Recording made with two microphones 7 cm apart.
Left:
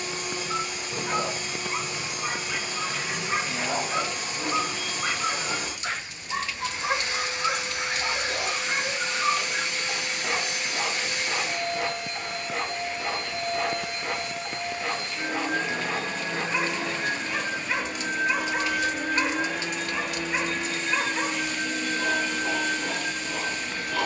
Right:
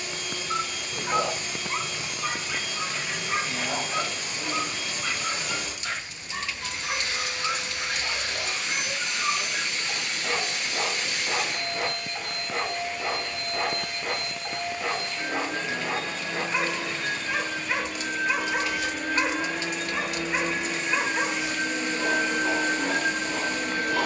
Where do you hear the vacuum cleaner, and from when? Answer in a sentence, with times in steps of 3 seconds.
In this clip you hear the vacuum cleaner on the left from 0 s, in the centre from 18 s and on the right from 21 s.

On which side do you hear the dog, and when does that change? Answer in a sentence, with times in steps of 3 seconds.
In this clip you hear the dog in the centre from 0 s, on the left from 3 s and in the centre from 9 s.